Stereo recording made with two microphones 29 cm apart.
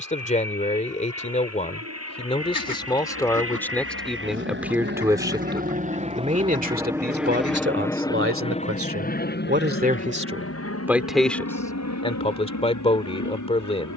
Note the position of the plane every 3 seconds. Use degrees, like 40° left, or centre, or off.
60° right, 40° right, centre, 40° left, 60° left.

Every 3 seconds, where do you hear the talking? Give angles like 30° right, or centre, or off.
20° left, centre, 40° right, 20° right, 20° left.